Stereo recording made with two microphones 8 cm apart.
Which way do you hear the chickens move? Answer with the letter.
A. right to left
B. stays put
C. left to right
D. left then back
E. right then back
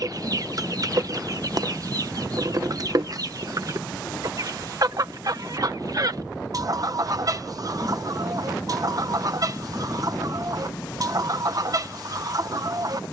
B.